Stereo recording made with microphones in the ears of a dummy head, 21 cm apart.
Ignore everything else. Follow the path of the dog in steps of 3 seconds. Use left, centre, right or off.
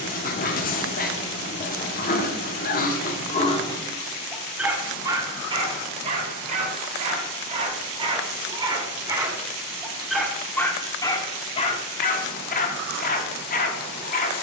left, centre, right, centre, left.